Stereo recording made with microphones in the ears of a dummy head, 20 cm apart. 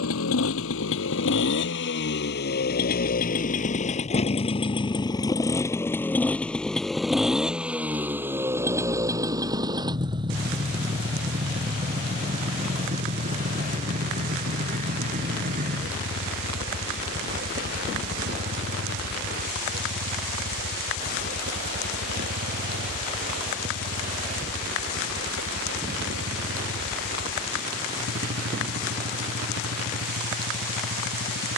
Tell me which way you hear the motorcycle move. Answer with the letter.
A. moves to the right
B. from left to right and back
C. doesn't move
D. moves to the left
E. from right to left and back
A.